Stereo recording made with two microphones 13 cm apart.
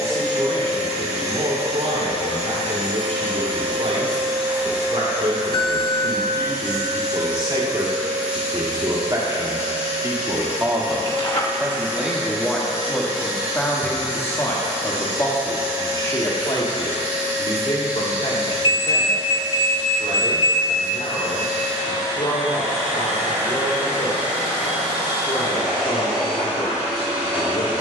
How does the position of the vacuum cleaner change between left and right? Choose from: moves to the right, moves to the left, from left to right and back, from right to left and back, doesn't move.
doesn't move.